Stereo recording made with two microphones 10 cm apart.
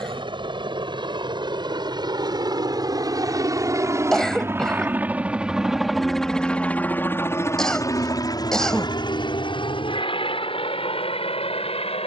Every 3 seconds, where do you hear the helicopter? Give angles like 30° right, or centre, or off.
50° right, 20° right, 30° left, 60° left.